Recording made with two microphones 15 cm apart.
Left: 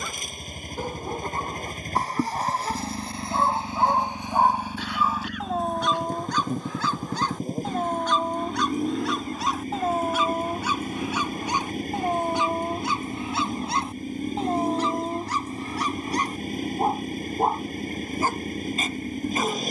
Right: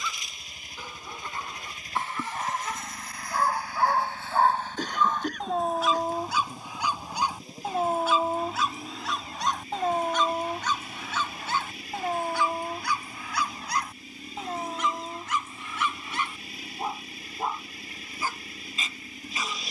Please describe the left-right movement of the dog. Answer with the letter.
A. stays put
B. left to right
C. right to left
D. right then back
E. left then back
D.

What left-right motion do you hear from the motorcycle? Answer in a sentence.
In this clip you hear the motorcycle stay put.